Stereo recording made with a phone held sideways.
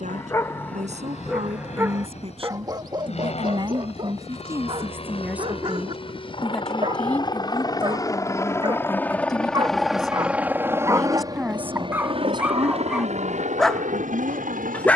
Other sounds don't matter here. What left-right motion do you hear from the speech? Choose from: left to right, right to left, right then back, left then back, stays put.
left then back.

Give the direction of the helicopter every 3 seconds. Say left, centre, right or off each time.
left, left, left, centre, right.